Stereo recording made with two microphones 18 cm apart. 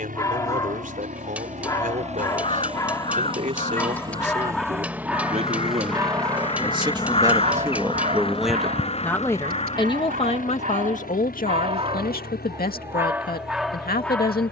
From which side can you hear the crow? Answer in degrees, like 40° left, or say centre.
30° left.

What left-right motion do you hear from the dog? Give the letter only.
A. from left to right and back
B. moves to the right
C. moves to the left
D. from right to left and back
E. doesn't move
A.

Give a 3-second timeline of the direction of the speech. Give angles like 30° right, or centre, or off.
50° right, 40° right, 20° right, 40° left, 60° left.